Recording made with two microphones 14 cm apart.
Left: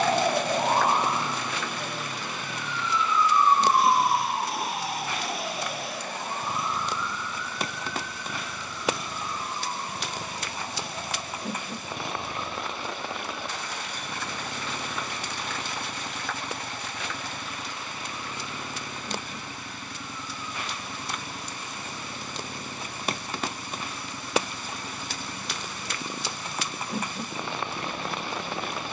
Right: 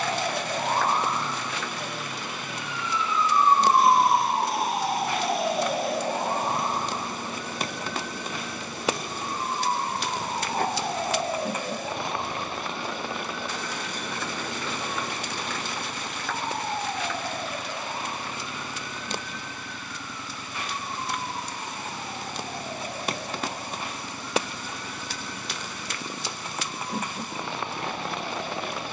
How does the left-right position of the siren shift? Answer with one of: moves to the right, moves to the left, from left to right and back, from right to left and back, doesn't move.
moves to the right.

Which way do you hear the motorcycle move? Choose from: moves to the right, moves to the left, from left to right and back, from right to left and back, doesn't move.
doesn't move.